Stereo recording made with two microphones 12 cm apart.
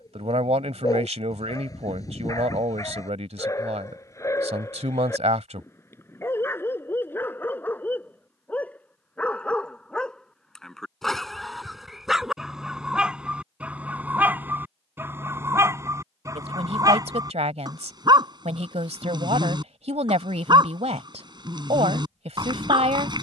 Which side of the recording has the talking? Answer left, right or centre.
right.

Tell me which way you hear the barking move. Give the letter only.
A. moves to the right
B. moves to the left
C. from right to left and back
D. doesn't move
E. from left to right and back
A.